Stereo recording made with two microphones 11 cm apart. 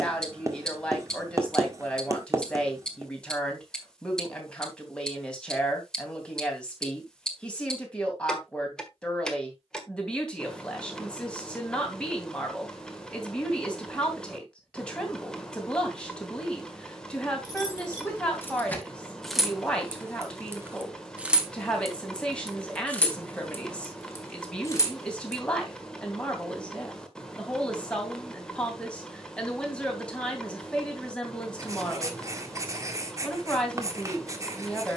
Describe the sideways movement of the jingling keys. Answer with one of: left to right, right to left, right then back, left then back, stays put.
right then back.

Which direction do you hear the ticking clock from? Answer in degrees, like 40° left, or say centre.
10° left.